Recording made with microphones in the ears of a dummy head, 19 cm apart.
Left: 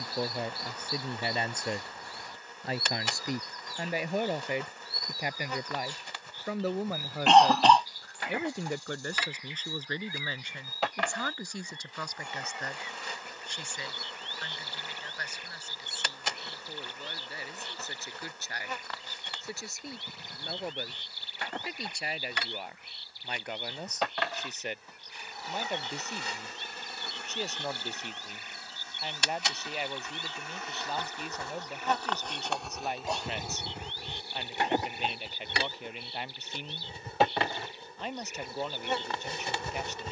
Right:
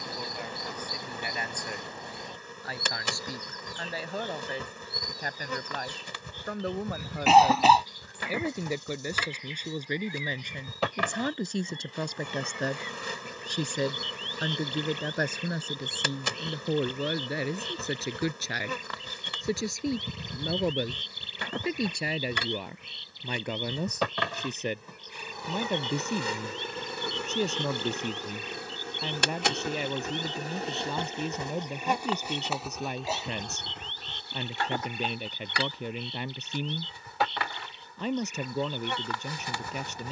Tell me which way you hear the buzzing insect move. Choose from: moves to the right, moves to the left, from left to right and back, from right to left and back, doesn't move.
moves to the left.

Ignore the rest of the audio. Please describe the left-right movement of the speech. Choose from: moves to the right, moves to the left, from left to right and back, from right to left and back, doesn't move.
moves to the right.